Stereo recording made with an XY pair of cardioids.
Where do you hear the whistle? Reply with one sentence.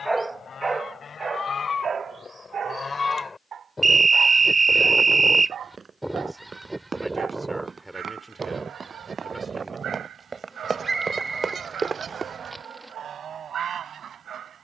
You can hear the whistle on the right.